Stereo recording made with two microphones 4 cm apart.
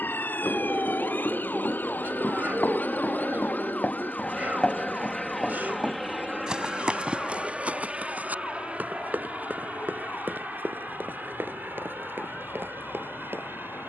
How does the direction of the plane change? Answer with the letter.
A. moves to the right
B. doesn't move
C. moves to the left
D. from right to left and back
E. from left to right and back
A.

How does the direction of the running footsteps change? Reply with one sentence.
You can hear the running footsteps move from left to right.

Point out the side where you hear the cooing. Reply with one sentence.
You can hear the cooing on the right.